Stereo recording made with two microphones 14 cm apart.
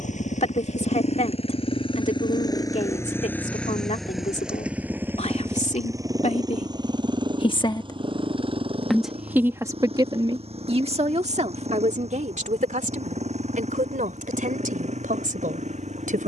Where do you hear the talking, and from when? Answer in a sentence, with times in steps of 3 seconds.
You can hear the talking on the left from 0 s and on the right from 9 s.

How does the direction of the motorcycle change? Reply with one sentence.
In this clip you hear the motorcycle go from the left side to the right.